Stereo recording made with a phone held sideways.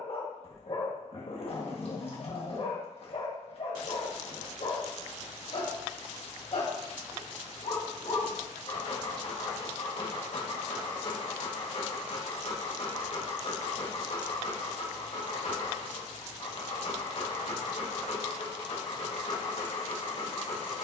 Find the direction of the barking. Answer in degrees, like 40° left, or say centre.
50° left.